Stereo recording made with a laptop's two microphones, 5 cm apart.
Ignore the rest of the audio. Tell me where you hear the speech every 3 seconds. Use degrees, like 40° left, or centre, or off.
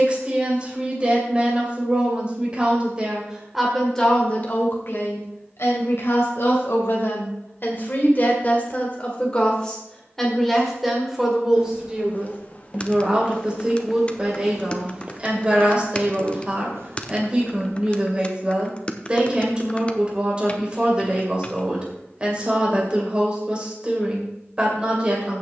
20° right, 30° left, 50° left, centre, 20° right, 20° right, 20° right, 20° right, 20° right.